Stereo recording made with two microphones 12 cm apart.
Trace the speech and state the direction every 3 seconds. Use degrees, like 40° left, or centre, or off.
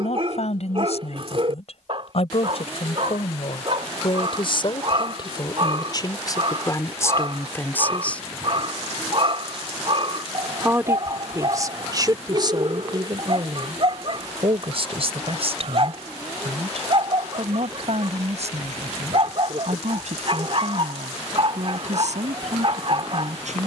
60° left, 40° left, 20° left, 30° right, 40° right, 60° right, 70° right, 70° right.